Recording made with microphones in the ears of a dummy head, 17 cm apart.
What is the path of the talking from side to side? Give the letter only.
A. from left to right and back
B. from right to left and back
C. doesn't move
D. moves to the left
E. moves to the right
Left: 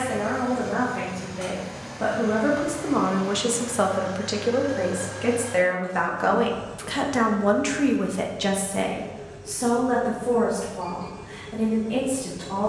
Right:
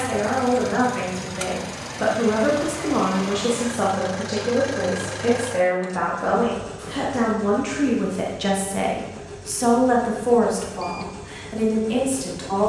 B.